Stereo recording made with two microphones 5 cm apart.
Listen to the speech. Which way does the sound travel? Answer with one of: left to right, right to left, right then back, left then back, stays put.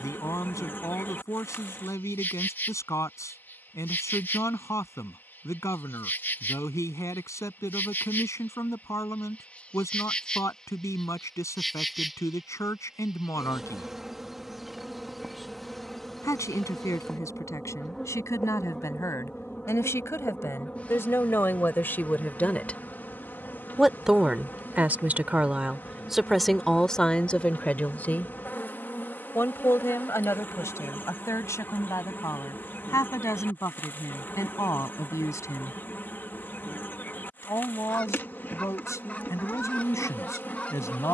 right then back.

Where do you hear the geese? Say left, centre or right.
left.